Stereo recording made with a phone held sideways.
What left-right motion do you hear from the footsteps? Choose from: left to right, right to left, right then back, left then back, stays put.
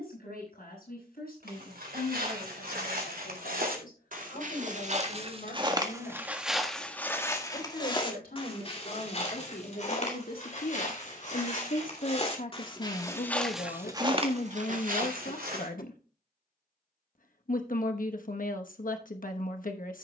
left then back.